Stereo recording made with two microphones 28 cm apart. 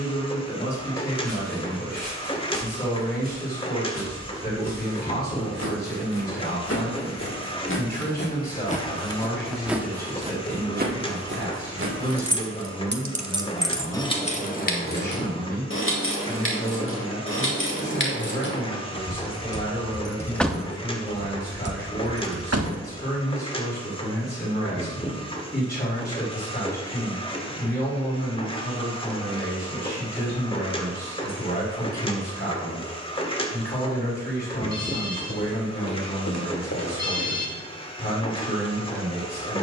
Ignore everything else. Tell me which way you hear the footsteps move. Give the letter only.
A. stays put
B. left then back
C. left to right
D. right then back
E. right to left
C.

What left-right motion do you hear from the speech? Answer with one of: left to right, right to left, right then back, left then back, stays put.
stays put.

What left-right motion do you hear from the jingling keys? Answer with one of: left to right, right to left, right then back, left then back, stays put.
left then back.